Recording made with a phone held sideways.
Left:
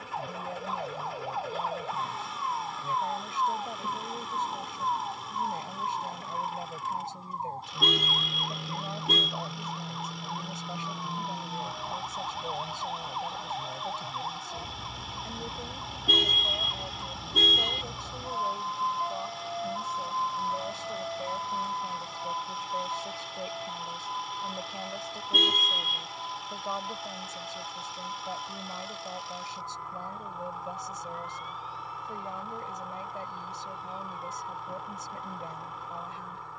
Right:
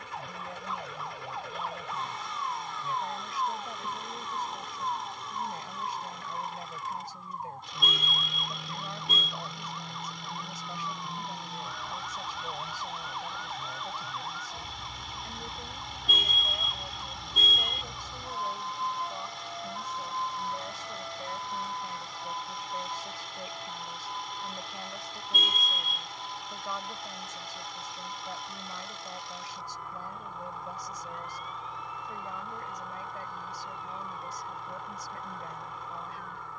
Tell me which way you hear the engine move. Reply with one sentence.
In this clip you hear the engine stay in one place.